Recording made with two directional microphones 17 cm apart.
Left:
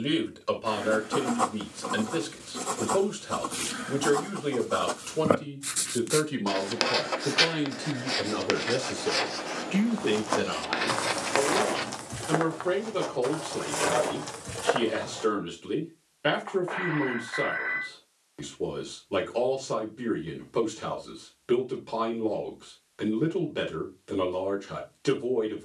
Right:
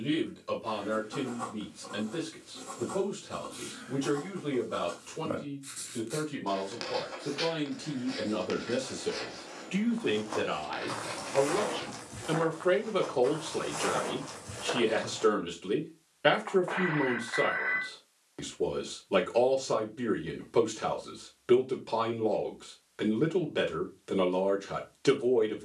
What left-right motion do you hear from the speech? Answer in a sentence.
You can hear the speech move from left to right.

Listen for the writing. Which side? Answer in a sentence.
You can hear the writing on the left.